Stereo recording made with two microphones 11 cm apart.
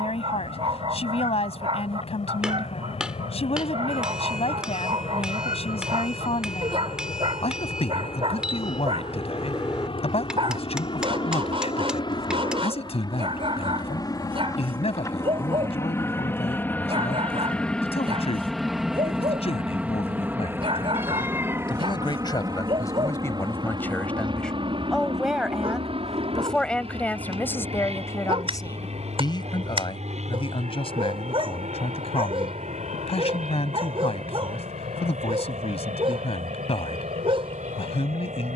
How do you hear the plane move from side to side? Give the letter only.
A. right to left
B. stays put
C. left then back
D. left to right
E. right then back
D.